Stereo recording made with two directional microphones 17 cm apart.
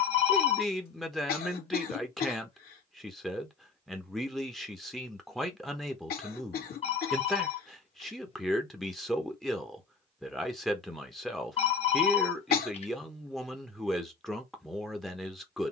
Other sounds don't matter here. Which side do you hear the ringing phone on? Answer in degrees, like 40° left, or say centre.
40° left.